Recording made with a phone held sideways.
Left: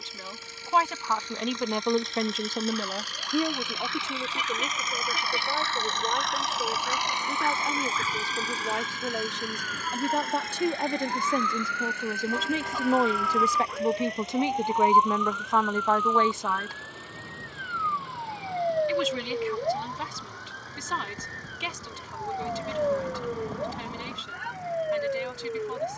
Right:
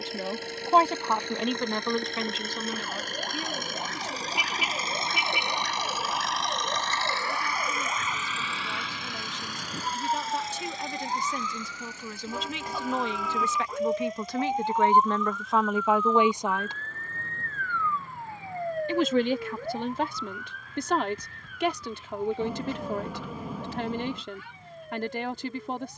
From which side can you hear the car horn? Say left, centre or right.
centre.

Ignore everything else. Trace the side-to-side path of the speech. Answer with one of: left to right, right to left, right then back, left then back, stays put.
left then back.